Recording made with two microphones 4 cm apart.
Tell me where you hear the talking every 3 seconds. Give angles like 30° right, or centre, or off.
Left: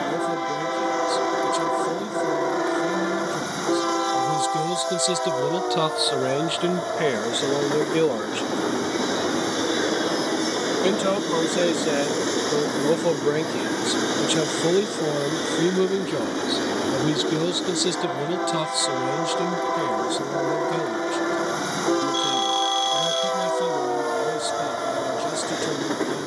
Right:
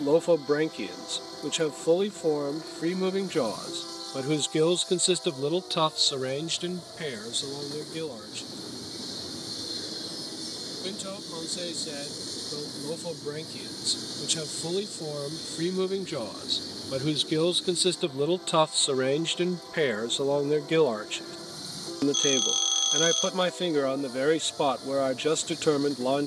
60° right, 30° right, 40° left, 60° left, 50° left, 10° left, 40° right, 60° right, 60° right.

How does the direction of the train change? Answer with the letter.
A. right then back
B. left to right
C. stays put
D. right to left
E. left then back
C.